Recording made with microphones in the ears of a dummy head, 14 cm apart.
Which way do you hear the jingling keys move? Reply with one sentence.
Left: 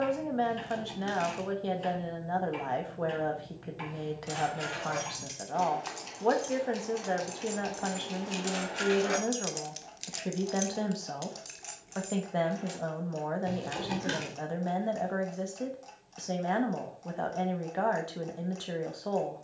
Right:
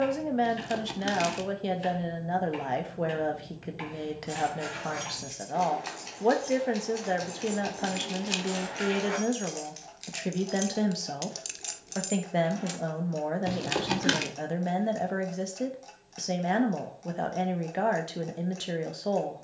You can hear the jingling keys travel towards the right.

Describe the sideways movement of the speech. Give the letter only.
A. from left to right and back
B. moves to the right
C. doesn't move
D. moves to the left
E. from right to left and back
C.